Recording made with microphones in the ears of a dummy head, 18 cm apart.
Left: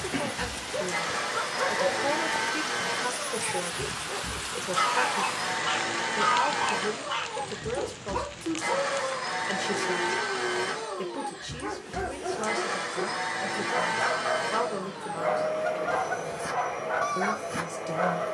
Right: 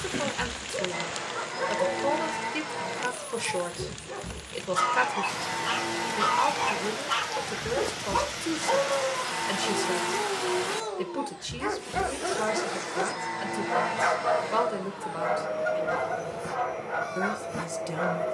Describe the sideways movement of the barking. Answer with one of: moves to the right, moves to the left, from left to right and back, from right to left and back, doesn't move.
from left to right and back.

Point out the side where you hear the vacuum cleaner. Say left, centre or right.
left.